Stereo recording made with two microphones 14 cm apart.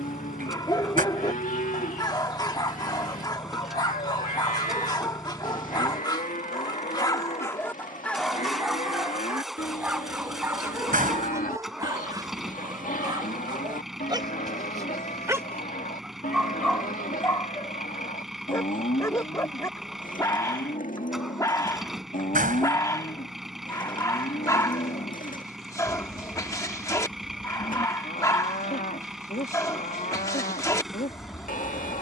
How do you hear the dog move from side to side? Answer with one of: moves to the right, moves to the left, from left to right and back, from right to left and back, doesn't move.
from left to right and back.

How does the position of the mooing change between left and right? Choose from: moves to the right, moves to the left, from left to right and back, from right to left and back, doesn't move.
doesn't move.